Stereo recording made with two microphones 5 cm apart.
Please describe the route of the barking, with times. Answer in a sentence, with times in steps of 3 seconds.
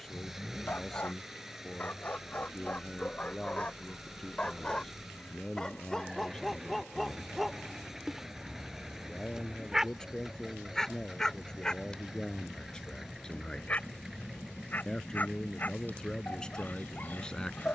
In this clip you hear the barking on the left from 0 s, in the centre from 6 s and on the left from 12 s.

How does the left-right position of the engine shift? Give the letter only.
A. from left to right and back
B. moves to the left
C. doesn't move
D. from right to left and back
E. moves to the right
C.